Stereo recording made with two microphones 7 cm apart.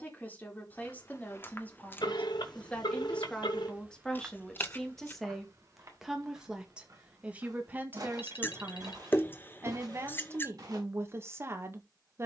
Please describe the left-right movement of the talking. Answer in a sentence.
You can hear the talking go from the left side to the right.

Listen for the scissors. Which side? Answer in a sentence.
You can hear the scissors on the left.